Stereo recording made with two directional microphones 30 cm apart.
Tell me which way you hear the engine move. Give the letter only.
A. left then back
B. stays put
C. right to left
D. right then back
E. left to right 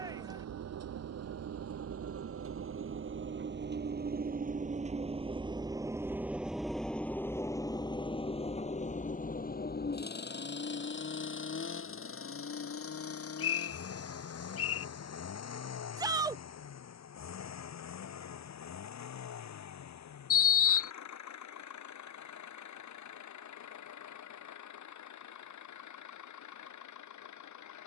C.